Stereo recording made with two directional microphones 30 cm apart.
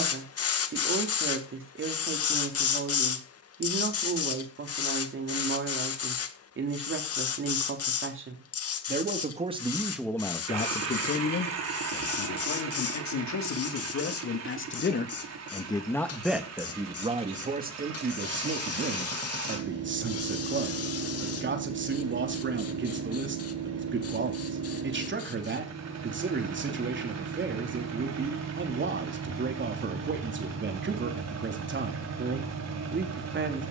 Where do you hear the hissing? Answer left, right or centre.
left.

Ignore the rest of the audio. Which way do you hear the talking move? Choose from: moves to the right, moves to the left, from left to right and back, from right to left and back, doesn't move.
from right to left and back.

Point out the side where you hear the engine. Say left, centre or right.
right.